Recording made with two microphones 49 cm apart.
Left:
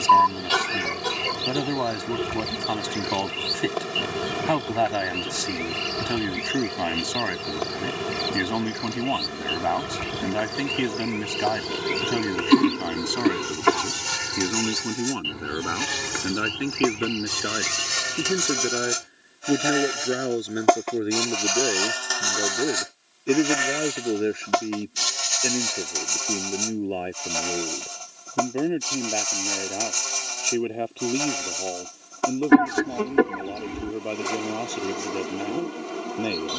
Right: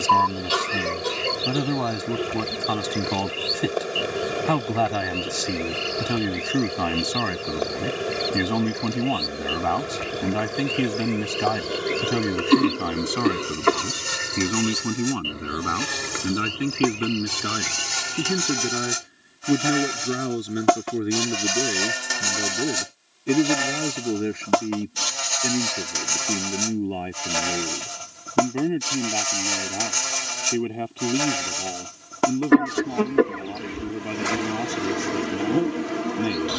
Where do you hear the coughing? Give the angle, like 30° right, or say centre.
10° left.